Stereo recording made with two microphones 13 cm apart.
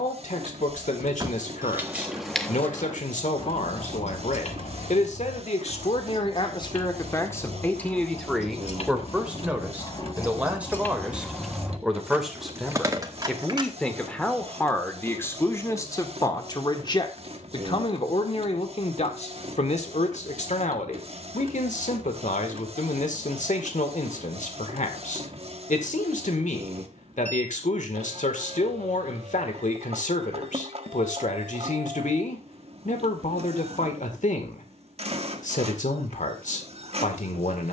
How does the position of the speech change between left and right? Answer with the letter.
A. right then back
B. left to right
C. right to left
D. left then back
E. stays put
A.